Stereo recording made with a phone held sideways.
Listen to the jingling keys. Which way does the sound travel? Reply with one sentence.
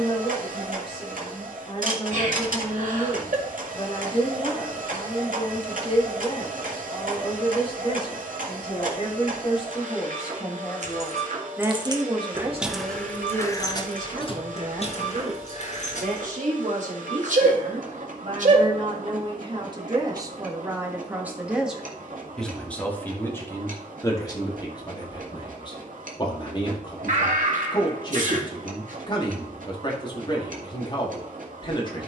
In this clip you hear the jingling keys move from right to left.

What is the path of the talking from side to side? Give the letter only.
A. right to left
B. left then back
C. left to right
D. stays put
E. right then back
E.